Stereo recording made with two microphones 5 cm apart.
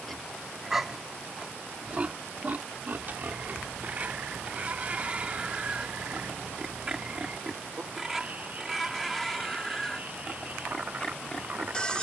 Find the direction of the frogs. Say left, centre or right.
right.